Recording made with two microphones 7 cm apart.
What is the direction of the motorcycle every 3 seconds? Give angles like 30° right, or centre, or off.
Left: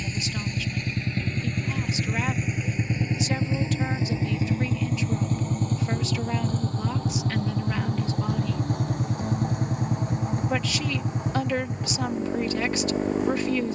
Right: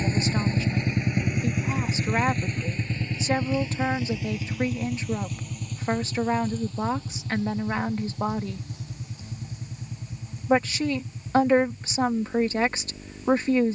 10° right, 30° left, 50° left, 60° left, 70° left.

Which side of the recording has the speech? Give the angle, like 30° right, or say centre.
30° right.